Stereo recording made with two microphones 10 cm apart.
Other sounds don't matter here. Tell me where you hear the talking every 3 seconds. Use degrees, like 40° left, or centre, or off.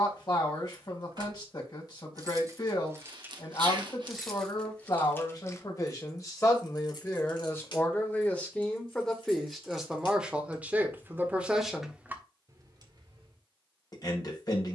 40° left, 40° left, 20° left, 10° right, 40° left.